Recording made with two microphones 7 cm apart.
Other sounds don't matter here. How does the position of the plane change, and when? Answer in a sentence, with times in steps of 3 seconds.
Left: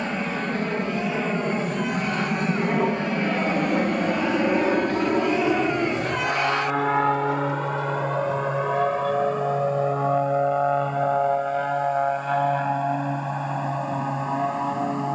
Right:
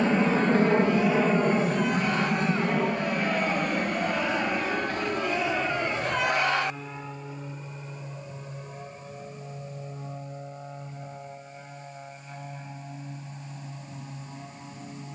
You can hear the plane in the centre from 0 s and on the left from 3 s.